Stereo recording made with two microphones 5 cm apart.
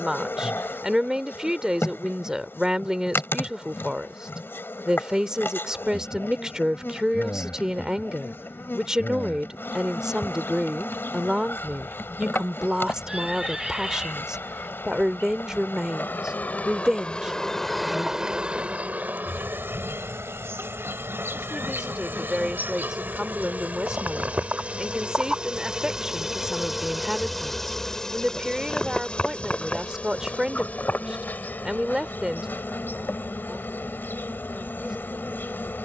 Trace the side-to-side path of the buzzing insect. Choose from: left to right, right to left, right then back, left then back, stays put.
right then back.